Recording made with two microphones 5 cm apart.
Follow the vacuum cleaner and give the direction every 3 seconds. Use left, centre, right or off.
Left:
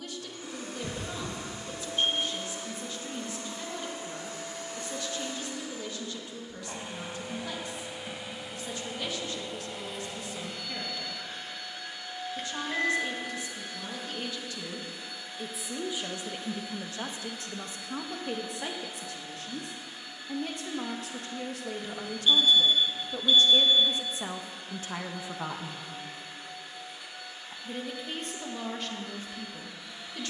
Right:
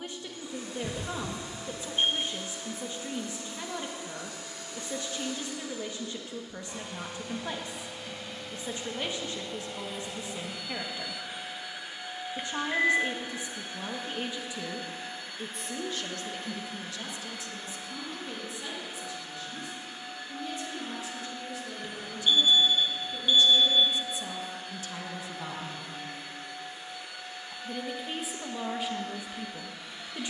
left, left, left, centre, right, right, right, right, right, right.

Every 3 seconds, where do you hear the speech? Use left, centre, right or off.
right, right, right, right, right, left, left, left, left, centre.